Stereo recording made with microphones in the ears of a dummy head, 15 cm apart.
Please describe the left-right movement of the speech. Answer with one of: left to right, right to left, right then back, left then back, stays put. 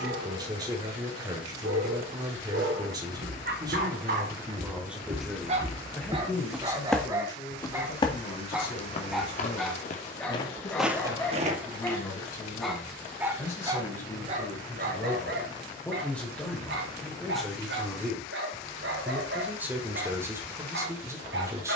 left then back.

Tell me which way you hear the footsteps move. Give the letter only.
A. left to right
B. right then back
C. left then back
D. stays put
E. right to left
C.